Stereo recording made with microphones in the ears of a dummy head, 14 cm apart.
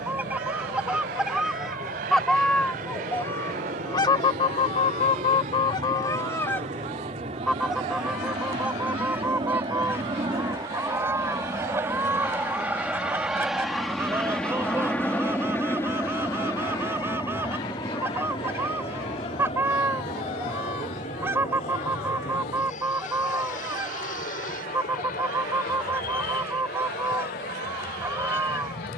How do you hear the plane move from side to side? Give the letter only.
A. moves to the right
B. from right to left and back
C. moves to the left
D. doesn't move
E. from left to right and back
C.